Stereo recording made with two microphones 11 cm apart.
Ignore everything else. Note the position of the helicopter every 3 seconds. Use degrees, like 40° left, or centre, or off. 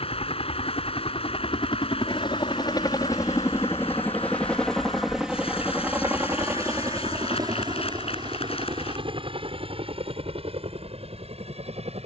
50° left, 10° left, 30° right, 50° right.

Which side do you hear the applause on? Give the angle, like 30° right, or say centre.
60° left.